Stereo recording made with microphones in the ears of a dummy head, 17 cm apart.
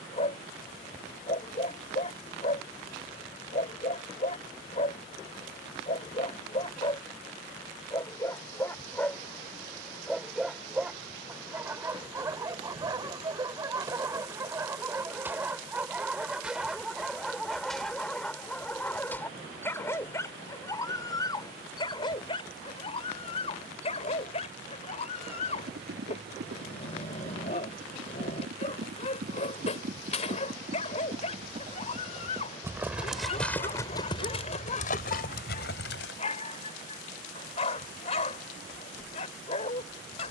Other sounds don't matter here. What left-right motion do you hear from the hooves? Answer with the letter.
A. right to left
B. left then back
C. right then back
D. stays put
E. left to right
A.